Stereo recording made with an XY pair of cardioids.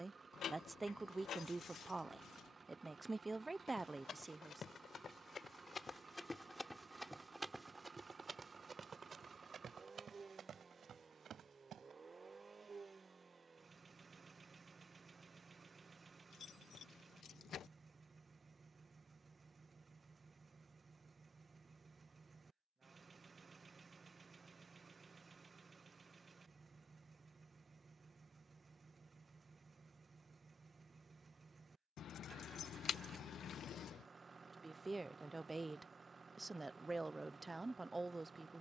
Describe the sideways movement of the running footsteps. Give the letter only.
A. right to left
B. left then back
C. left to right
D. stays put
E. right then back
C.